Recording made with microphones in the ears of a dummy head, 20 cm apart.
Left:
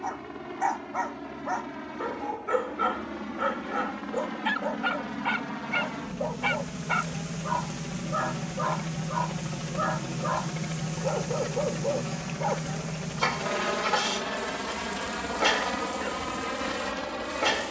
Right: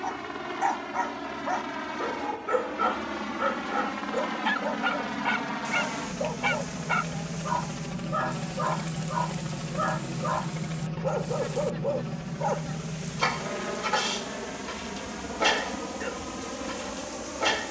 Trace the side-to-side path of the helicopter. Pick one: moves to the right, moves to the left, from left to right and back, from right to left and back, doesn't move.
moves to the left.